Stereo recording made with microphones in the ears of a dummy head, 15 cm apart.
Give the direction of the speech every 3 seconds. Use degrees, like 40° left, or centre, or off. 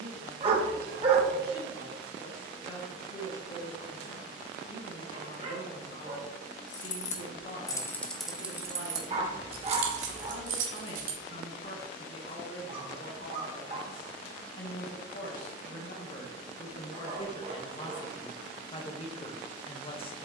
80° left, 80° left, 80° left, 70° left, 70° left, 40° left, 30° left.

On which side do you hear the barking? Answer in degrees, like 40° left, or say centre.
30° right.